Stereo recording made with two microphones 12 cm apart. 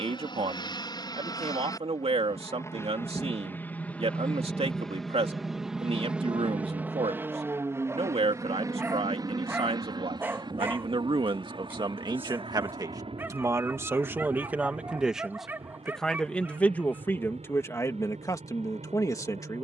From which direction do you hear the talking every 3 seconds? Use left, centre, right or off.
right, right, right, right, right, centre, left.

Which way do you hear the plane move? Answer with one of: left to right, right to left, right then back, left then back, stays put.
left to right.